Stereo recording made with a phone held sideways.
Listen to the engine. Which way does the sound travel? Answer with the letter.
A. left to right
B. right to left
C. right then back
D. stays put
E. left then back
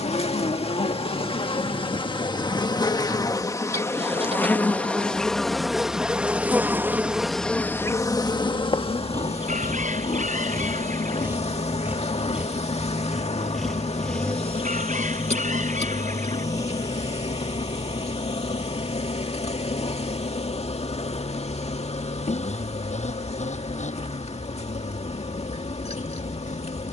B.